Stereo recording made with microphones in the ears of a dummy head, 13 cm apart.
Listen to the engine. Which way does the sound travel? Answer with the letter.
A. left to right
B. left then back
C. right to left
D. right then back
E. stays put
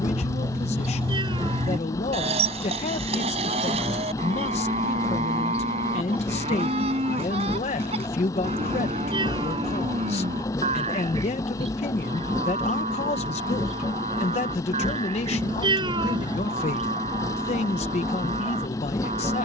E.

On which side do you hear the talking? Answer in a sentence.
In this clip you hear the talking on the left.